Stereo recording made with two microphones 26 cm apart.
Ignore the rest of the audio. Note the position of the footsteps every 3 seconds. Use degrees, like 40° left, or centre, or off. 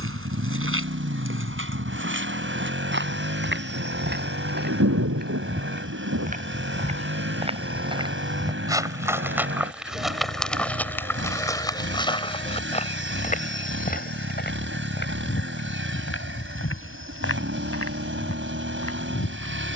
50° right, 40° right, 20° right, centre, 30° left, 50° left, 60° left.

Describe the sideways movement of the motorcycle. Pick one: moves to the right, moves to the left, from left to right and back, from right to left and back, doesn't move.
doesn't move.